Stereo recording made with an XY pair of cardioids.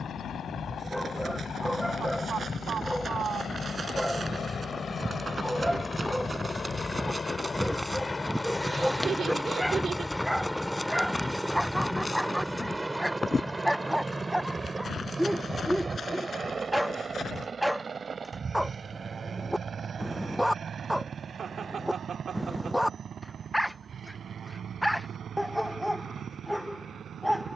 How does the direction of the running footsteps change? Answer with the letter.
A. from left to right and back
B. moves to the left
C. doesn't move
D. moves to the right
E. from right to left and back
B.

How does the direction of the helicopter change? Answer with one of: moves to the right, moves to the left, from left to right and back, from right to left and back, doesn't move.
moves to the right.